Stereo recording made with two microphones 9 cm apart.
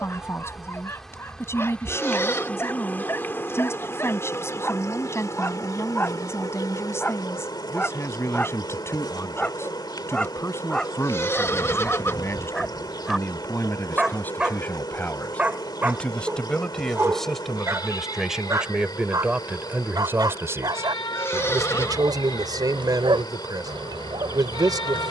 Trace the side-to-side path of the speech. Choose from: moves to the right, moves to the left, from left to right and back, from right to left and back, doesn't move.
moves to the right.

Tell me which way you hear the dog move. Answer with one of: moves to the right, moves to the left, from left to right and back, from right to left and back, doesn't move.
moves to the right.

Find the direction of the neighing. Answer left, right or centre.
left.